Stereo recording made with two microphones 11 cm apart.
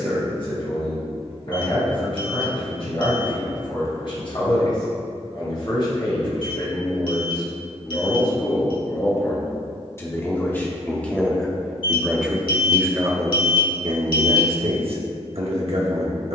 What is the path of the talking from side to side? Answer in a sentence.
In this clip you hear the talking go from the left side to the right.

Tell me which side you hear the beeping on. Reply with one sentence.
In this clip you hear the beeping on the left.